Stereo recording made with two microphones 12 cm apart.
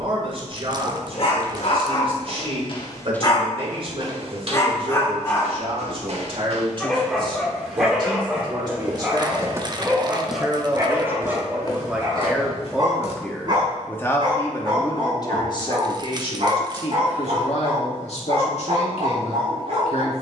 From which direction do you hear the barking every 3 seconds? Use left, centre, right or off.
left, left, centre, right, right, right, right.